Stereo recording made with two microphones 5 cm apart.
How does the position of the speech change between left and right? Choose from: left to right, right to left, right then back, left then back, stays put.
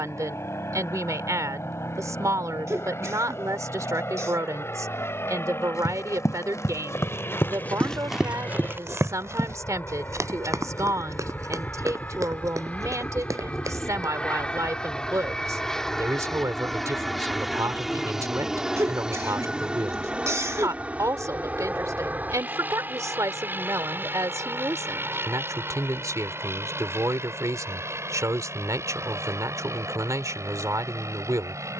stays put.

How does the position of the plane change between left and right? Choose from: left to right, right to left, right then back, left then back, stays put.
left to right.